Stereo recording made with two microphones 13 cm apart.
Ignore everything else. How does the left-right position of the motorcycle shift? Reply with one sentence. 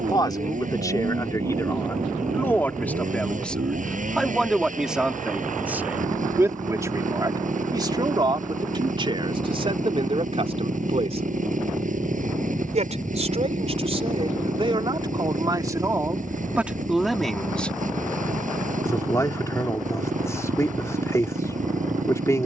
You can hear the motorcycle stay in one place.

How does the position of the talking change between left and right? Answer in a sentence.
In this clip you hear the talking go right and come back.